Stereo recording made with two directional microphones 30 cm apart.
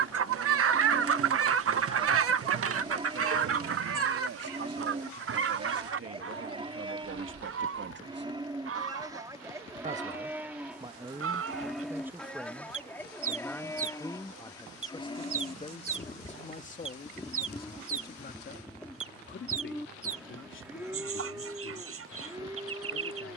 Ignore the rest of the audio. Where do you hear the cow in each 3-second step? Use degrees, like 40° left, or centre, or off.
20° right, 20° right, 20° right, 10° right, 10° left, 20° left, centre, 10° right.